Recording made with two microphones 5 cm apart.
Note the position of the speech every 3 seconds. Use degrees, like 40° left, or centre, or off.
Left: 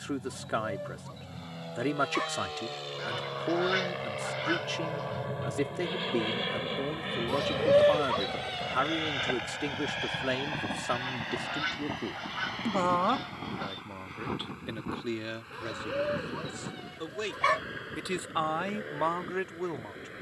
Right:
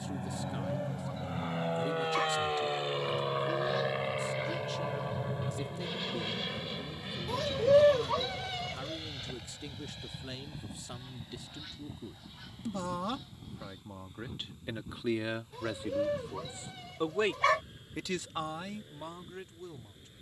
80° left, 80° left, 80° left, 70° left, 20° left, 20° right, 50° left.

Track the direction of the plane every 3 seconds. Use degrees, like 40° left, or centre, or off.
30° right, centre, 40° left, 60° left, 70° left, 70° left, 80° left.